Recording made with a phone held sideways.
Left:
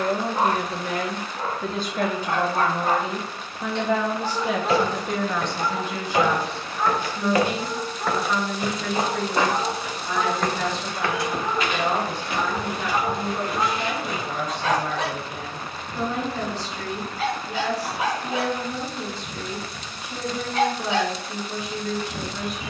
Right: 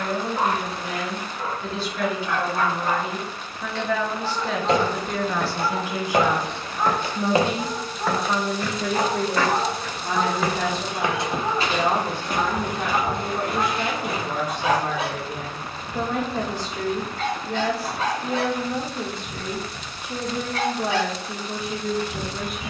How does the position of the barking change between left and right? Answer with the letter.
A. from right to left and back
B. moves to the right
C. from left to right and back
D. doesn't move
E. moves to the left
C.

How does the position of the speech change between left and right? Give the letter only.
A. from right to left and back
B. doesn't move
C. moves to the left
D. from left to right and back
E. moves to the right
E.